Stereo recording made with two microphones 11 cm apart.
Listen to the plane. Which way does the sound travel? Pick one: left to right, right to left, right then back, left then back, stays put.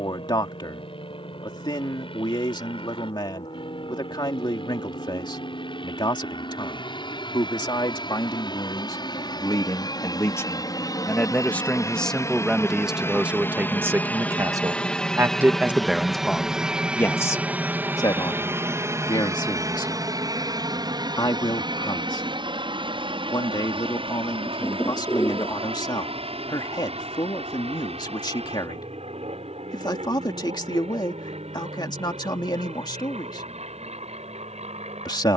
left to right.